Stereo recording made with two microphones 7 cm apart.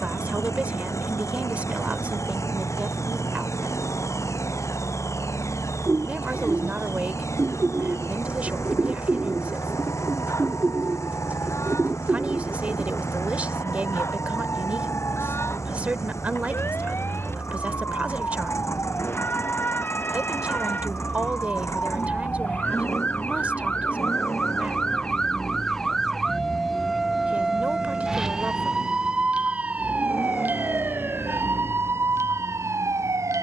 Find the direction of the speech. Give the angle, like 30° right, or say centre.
20° right.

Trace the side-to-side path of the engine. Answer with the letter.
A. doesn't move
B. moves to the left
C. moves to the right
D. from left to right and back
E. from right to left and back
A.